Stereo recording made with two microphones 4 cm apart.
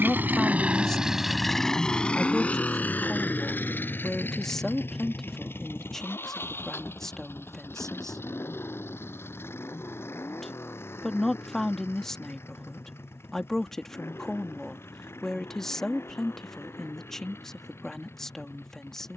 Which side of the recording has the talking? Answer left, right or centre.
centre.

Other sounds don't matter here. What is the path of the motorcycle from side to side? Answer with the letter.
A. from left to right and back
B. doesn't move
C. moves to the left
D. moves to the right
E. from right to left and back
C.